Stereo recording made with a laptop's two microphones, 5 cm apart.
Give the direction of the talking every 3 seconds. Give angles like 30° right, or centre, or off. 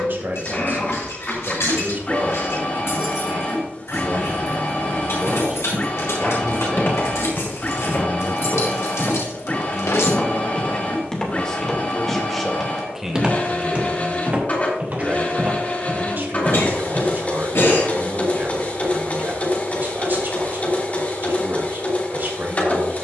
50° right, 50° right, 20° left, 20° left, 10° right, 40° right, 50° right, 50° right.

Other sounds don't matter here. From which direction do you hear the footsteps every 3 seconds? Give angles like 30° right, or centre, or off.
off, 60° left, 50° left, 20° left, 20° right, 50° right, off, off.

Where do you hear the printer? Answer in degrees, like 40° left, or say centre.
30° left.